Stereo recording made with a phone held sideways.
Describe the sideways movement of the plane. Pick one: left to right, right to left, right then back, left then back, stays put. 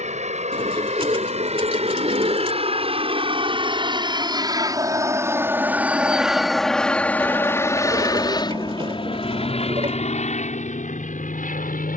right to left.